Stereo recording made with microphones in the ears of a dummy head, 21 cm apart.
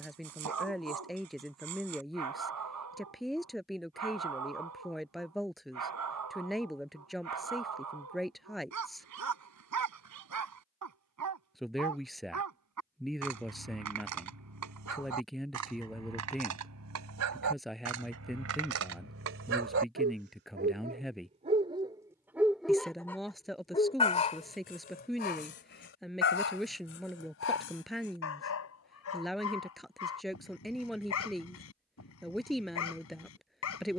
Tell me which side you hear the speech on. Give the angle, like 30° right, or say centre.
centre.